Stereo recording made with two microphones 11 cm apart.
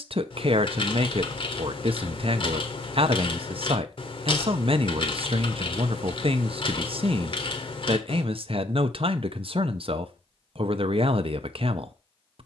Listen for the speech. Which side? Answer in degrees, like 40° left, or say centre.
60° right.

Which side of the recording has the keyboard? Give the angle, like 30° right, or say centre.
50° left.